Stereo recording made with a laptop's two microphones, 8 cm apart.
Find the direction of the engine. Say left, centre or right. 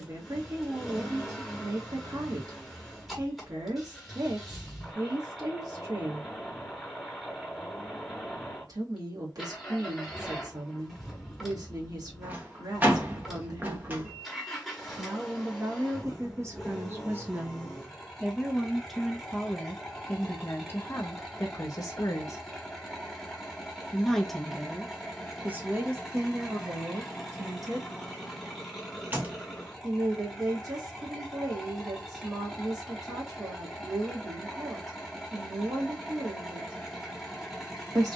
centre.